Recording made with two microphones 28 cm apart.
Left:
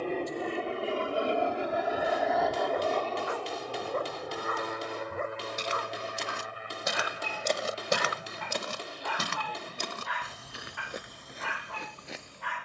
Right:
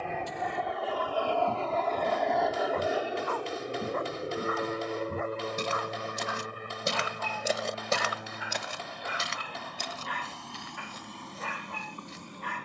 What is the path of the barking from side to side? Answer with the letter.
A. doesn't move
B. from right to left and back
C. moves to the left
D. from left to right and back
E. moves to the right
B.